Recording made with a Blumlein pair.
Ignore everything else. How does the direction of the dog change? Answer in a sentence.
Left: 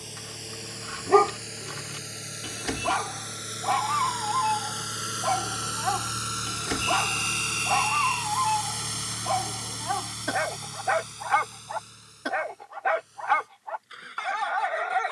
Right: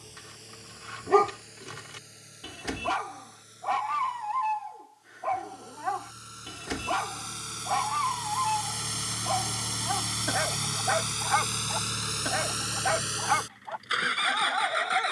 You can hear the dog stay put.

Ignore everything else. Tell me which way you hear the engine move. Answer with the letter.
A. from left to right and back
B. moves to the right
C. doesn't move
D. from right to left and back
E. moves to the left
B.